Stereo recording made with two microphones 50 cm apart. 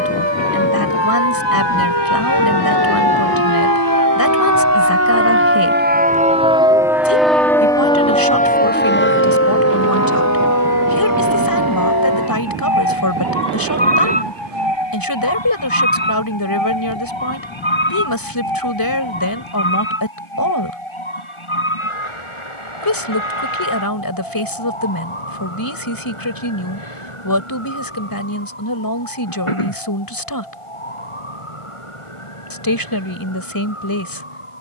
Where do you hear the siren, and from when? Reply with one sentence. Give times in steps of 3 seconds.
In this clip you hear the siren on the right from 0 s, in the centre from 6 s and on the left from 9 s.